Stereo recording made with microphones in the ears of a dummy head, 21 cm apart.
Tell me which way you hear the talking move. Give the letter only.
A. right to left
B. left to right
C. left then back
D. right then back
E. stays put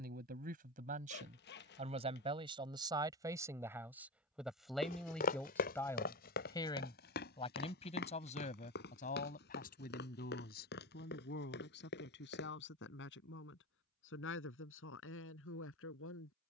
A.